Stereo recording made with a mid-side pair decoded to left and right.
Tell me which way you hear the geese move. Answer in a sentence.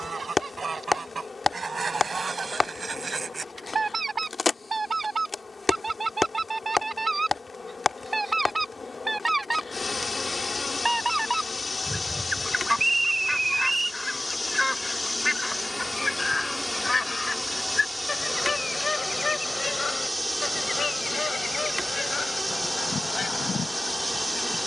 You can hear the geese move from right to left.